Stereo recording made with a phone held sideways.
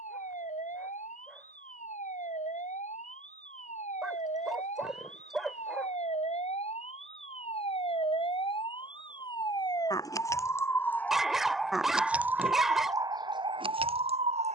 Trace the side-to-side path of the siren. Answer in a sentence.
You can hear the siren travel towards the right.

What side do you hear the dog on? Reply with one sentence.
In this clip you hear the dog in the centre.